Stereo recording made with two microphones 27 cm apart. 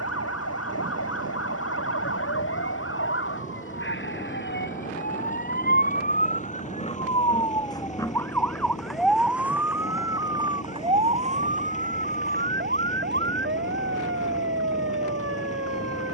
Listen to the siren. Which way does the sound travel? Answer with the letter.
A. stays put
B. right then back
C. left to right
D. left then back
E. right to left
C.